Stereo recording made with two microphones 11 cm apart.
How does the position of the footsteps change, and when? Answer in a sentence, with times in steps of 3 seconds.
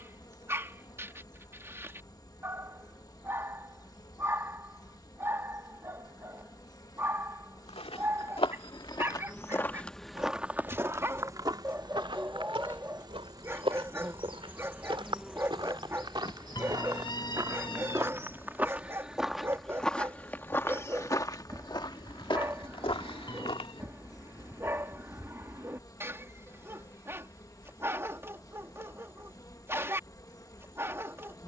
In this clip you hear the footsteps not at all from 0 s, on the left from 6 s, in the centre from 9 s, on the right from 12 s, in the centre from 18 s, on the left from 21 s and not at all from 24 s.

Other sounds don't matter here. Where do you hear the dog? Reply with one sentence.
In this clip you hear the dog on the right.